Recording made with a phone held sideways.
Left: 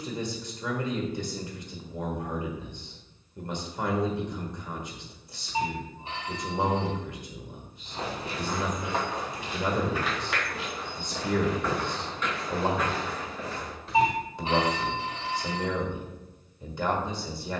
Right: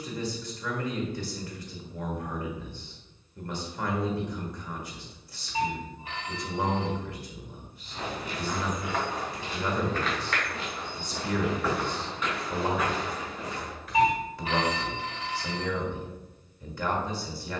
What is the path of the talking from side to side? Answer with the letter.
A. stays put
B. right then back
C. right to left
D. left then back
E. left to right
A.